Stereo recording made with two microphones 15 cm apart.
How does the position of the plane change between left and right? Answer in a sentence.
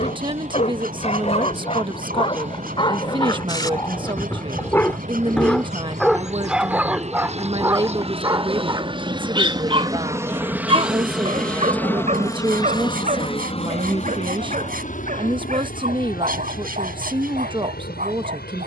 In this clip you hear the plane move from right to left.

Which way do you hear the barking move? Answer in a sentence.
In this clip you hear the barking move from left to right.